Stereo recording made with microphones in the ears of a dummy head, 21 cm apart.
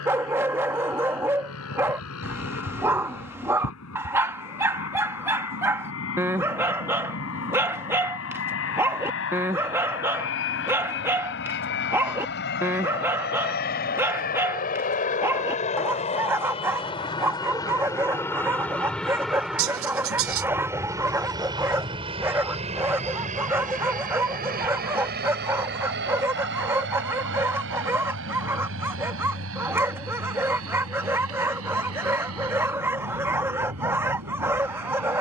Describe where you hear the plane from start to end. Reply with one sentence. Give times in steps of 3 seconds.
You can hear the plane on the left from 0 s, in the centre from 18 s and on the right from 21 s.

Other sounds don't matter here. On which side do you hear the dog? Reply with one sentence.
You can hear the dog in the centre.